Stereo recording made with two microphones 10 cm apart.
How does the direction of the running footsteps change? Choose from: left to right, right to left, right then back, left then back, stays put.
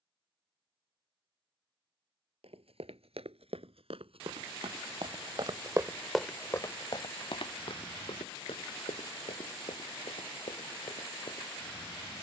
right to left.